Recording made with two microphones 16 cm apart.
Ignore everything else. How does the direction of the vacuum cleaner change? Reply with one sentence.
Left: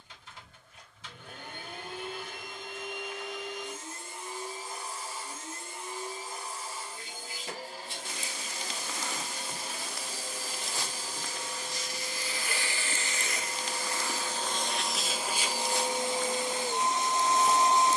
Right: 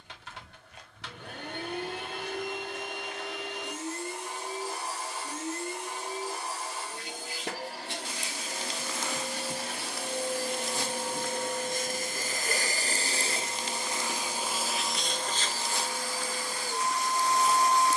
In this clip you hear the vacuum cleaner move to the left.